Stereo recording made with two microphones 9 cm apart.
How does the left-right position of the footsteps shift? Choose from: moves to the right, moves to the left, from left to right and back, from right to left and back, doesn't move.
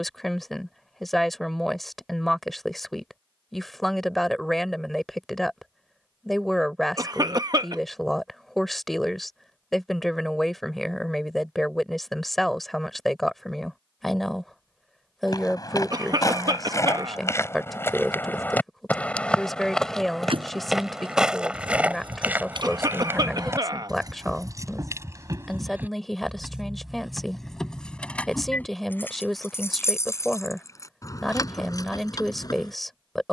moves to the right.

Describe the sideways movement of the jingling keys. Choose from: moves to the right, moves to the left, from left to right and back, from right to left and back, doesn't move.
moves to the left.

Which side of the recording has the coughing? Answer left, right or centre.
right.